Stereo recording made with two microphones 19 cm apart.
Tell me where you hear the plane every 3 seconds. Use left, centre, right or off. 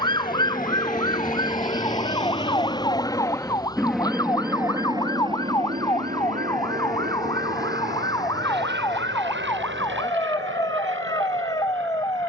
left, centre, right, right.